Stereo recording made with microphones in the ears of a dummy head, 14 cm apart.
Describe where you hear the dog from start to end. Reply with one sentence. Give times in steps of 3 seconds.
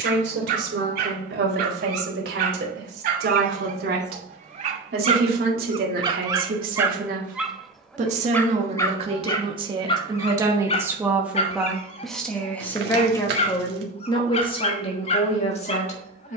You can hear the dog on the right from 0 s, in the centre from 6 s and on the left from 9 s.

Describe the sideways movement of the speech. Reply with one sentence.
In this clip you hear the speech move to the left.